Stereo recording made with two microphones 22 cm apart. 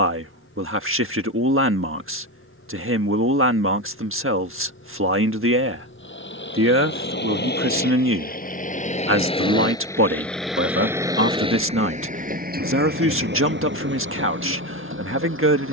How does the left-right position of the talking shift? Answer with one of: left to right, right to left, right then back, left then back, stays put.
stays put.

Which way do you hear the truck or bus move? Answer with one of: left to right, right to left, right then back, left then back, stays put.
left to right.